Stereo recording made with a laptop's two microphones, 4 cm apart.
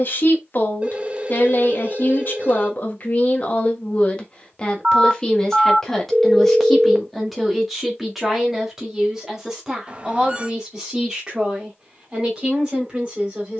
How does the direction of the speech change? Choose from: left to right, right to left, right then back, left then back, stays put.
left to right.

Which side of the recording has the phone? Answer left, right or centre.
right.